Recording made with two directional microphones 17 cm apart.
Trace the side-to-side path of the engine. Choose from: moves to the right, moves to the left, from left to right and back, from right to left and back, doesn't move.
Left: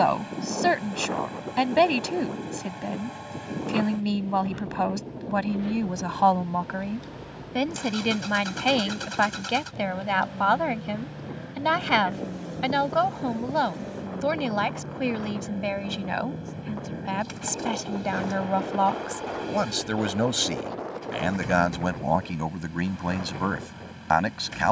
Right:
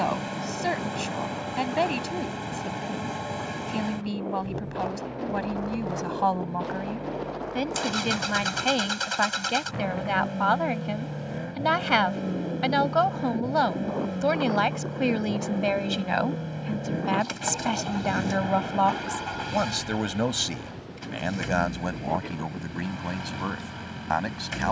doesn't move.